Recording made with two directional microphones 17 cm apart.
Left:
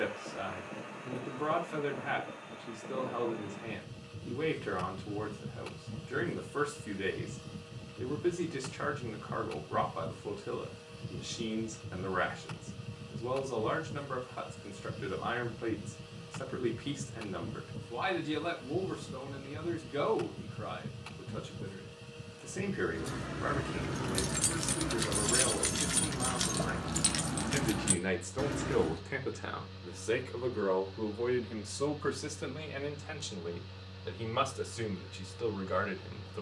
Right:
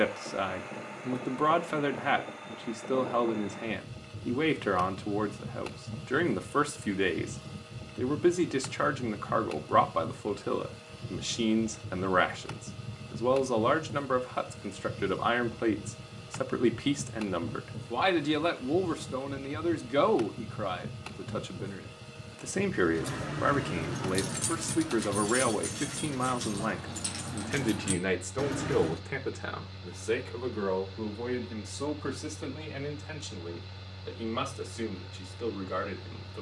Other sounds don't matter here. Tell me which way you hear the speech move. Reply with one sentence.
You can hear the speech move to the left.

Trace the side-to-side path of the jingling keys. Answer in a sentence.
In this clip you hear the jingling keys move from right to left and back again.